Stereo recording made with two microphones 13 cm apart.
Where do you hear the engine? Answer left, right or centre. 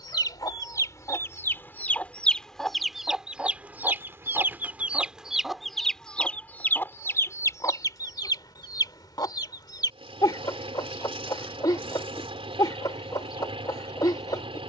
right.